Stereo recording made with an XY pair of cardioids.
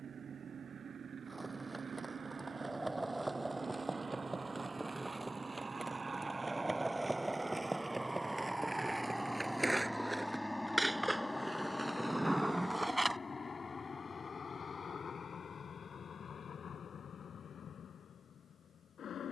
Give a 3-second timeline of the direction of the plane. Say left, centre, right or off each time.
right, right, right, centre, left, left, left.